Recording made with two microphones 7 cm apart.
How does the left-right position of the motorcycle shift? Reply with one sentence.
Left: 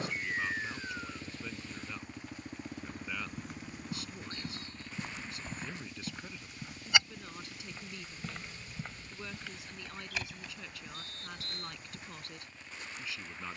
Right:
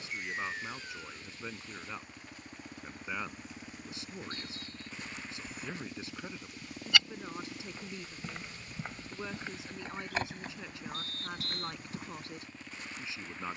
In this clip you hear the motorcycle move to the right.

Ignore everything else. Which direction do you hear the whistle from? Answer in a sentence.
In this clip you hear the whistle on the left.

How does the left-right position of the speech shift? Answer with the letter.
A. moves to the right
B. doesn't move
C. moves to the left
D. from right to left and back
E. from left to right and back
B.